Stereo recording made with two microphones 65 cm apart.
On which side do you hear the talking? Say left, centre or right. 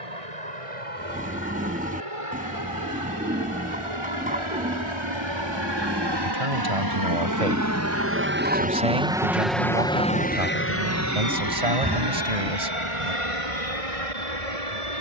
right.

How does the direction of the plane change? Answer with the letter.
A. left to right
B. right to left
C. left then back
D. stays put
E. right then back
B.